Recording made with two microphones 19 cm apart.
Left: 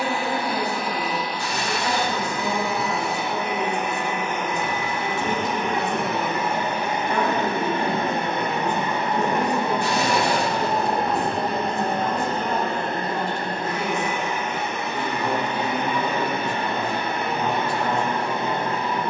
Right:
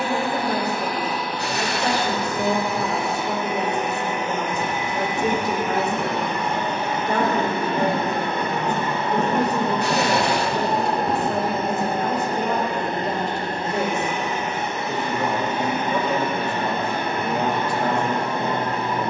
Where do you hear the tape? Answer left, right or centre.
right.